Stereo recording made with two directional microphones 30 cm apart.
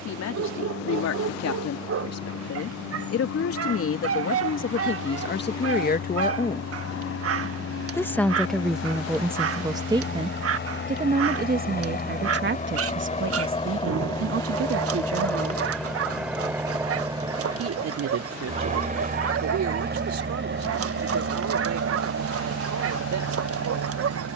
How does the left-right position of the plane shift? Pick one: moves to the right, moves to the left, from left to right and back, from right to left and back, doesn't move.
moves to the right.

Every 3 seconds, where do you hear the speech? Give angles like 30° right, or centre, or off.
60° left, 40° left, 10° left, 20° right, 40° right, 50° right, 60° right, 70° right.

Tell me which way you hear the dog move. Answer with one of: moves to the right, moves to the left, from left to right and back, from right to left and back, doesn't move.
doesn't move.